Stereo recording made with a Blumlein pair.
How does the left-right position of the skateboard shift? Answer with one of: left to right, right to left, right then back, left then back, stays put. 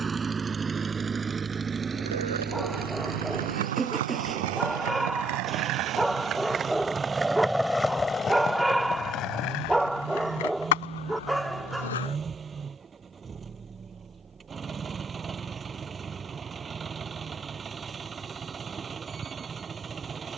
right to left.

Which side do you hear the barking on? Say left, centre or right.
centre.